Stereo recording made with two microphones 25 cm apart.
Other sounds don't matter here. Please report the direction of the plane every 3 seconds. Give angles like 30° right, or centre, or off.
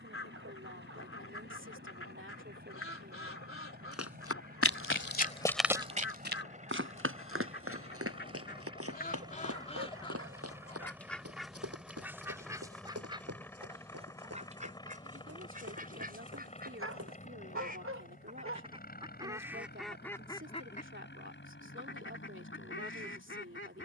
50° right, 40° right, 30° right, 10° right, 10° left, 20° left, 40° left, 50° left.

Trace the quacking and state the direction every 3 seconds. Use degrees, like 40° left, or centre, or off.
60° left, 60° left, 50° left, 10° left, 20° right, 40° right, 10° right, 50° left.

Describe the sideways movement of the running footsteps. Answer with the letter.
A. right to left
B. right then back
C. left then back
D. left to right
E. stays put
D.